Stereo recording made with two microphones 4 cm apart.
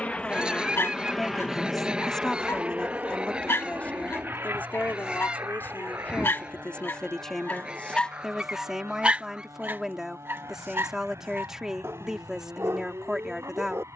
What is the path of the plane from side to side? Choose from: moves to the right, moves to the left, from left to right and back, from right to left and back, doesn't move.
moves to the right.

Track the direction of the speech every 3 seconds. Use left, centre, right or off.
centre, left, centre, centre, centre.